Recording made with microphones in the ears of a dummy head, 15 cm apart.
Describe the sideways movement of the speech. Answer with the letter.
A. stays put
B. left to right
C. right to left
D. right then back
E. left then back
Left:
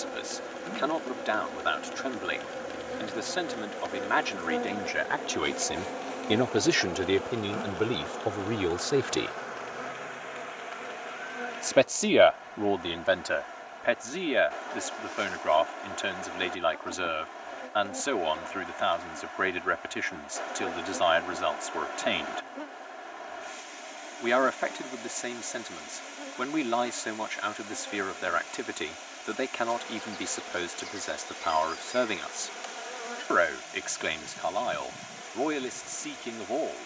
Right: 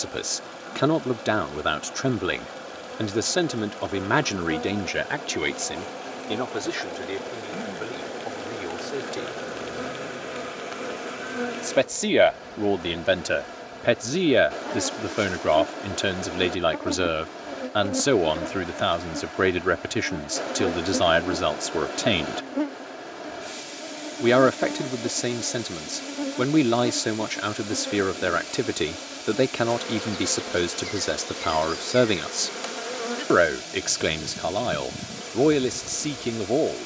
E.